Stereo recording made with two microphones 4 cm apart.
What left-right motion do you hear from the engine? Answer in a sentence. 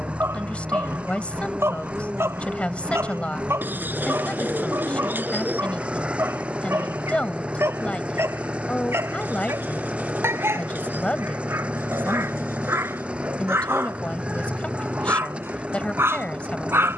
You can hear the engine stay put.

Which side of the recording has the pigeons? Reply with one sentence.
In this clip you hear the pigeons on the right.